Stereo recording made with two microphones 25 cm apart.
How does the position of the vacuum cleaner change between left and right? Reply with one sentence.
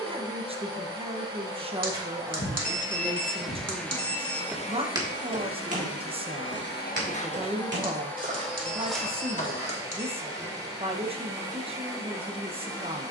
You can hear the vacuum cleaner move from right to left and back again.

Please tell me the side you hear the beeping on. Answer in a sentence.
In this clip you hear the beeping on the right.